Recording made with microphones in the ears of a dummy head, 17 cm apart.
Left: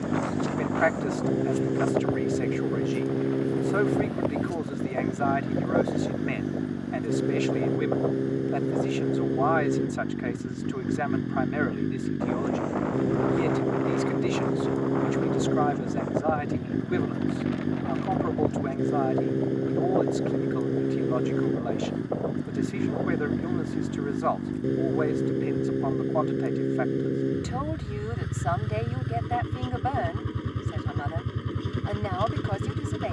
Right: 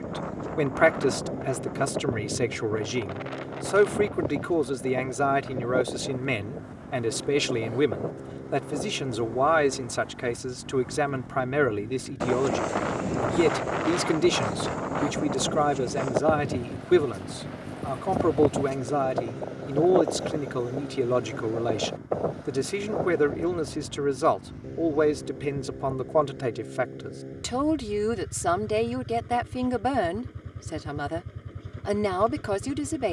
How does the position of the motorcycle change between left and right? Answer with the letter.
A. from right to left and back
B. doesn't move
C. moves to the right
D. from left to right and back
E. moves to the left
B.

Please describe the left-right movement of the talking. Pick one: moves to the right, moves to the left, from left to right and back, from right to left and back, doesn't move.
doesn't move.